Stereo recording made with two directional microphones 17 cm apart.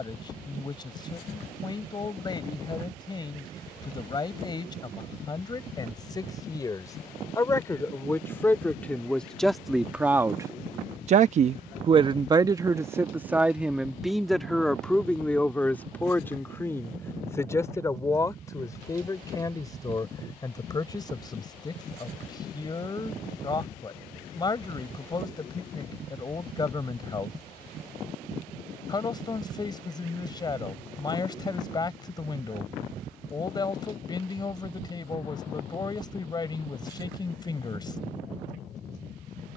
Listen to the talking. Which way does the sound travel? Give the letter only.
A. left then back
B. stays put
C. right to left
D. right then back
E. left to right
D.